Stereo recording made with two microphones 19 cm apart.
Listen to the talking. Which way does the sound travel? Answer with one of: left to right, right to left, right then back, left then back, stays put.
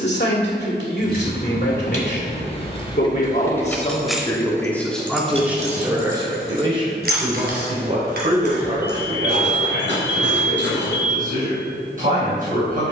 left to right.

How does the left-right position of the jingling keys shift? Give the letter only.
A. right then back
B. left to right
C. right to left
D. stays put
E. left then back
B.